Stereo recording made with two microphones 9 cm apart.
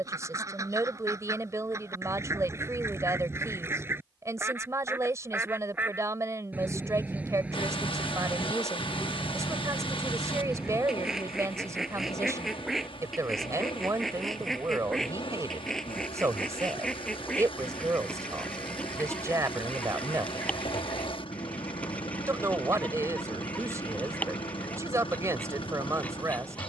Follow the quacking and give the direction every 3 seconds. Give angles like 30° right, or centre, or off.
30° right, 20° right, 10° right, 10° right, centre, 10° left, 10° left, 20° left, 20° left.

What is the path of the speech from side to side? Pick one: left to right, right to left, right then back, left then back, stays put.
stays put.